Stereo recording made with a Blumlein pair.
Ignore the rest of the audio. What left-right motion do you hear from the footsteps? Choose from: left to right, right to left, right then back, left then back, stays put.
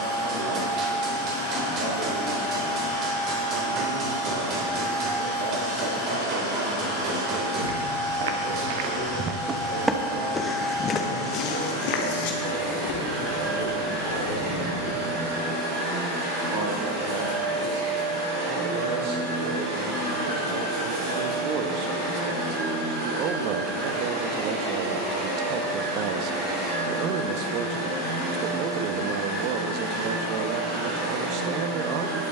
right to left.